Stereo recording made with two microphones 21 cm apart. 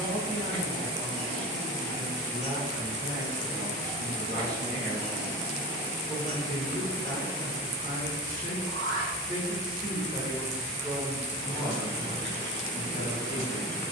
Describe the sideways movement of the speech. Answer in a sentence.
In this clip you hear the speech move from right to left.